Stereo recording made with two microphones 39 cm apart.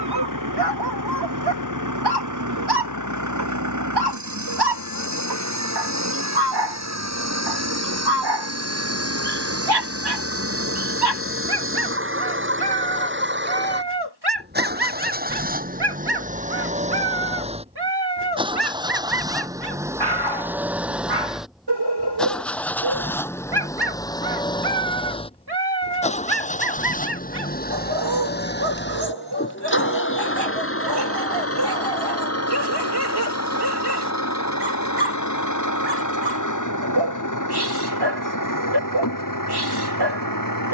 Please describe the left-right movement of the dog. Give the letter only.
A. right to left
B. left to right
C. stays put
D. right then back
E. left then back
C.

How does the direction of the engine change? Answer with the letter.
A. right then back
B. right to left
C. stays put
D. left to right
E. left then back
B.